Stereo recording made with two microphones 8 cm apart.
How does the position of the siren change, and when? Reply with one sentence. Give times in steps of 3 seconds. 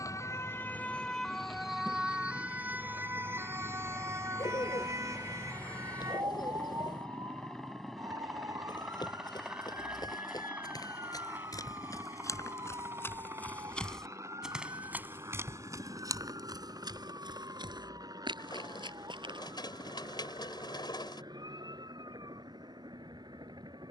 In this clip you hear the siren in the centre from 0 s and on the right from 3 s.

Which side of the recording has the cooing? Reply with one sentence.
You can hear the cooing on the left.